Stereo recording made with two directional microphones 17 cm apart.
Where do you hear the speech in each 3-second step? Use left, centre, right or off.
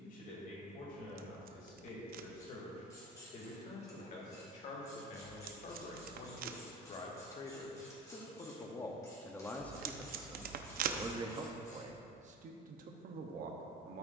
left, left, left, centre, right.